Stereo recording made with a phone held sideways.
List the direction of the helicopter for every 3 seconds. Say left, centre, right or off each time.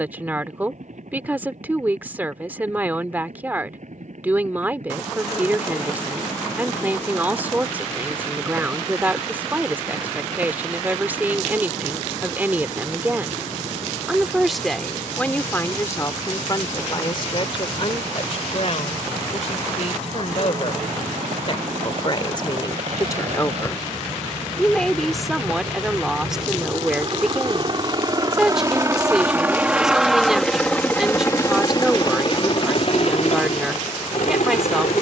right, right, right, right, right, right, right, right, right, right, left, left.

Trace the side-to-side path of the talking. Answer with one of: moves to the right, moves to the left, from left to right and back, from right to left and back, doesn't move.
from right to left and back.